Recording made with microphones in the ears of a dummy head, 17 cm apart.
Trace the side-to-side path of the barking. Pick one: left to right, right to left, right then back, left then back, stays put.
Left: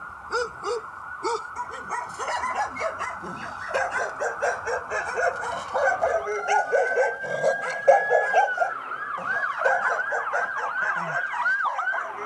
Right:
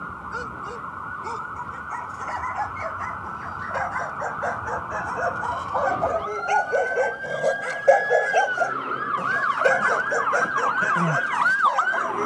left to right.